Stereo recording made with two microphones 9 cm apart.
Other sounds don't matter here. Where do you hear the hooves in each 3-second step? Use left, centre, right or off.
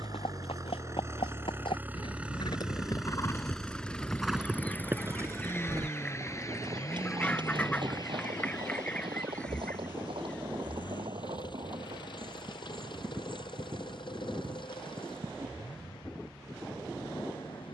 left, centre, right, right, right, right.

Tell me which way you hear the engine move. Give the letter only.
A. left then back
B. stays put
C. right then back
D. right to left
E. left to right
D.